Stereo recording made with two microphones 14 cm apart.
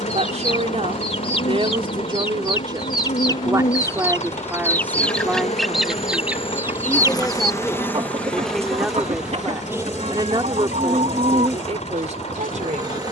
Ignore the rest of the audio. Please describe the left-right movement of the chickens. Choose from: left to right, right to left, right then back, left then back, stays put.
left to right.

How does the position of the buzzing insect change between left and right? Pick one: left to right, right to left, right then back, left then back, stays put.
left to right.